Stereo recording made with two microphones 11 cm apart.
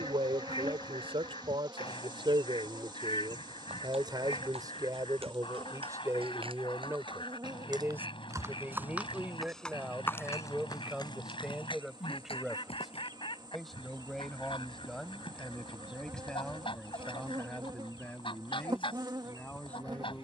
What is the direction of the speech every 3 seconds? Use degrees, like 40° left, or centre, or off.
60° right, 40° right, 20° right, 10° right, centre, 10° left, 10° left.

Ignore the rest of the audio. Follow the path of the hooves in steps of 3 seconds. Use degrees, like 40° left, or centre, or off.
off, 60° right, 40° right, 30° left, 60° left, off, off.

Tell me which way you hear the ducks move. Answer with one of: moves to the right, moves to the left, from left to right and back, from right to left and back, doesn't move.
doesn't move.